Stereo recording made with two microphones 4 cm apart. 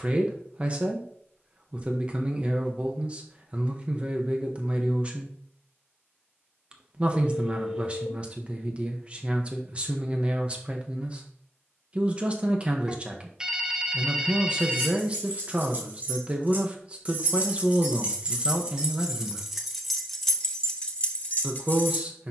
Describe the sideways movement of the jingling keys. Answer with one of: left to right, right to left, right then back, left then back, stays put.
right to left.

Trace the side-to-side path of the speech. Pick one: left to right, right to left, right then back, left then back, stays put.
stays put.